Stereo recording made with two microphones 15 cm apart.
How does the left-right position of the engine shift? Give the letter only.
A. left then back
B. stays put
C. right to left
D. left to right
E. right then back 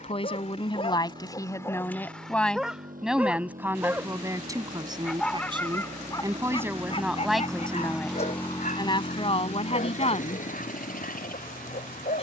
C.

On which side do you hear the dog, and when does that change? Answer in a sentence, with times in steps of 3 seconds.
You can hear the dog on the left from 0 s, in the centre from 3 s and on the left from 6 s.